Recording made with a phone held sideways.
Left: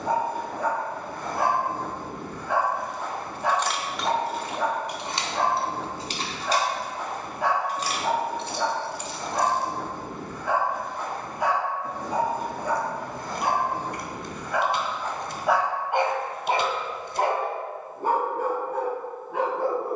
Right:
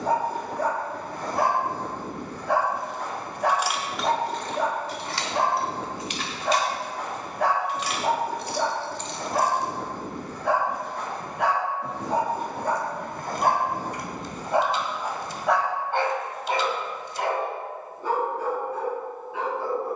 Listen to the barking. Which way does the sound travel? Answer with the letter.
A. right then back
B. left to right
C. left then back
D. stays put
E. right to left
E.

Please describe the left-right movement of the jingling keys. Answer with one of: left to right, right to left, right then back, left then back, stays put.
left then back.